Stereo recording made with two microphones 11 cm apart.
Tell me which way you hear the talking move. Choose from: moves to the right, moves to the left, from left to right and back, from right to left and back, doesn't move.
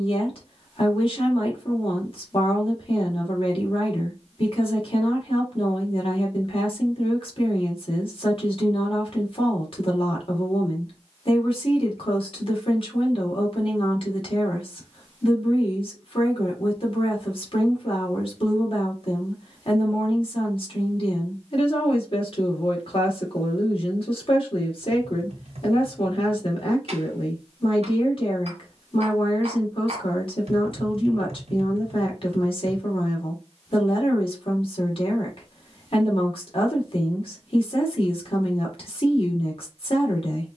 doesn't move.